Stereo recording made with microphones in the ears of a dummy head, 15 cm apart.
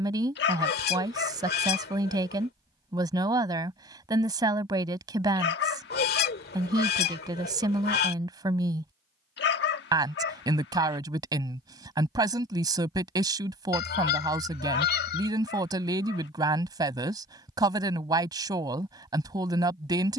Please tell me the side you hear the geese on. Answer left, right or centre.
left.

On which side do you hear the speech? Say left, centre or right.
right.